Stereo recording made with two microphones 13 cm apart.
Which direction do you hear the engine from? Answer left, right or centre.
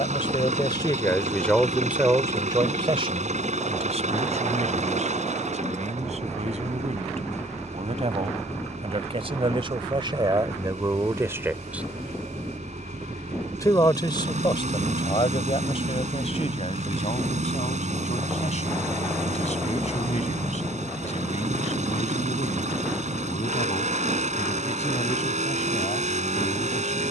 right.